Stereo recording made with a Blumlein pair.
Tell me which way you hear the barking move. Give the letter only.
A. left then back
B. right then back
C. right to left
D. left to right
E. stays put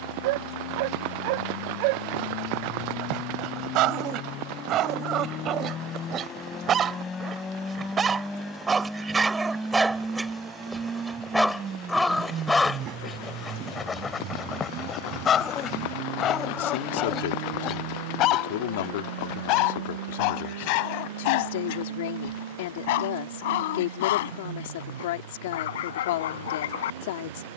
C.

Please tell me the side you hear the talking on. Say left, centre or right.
left.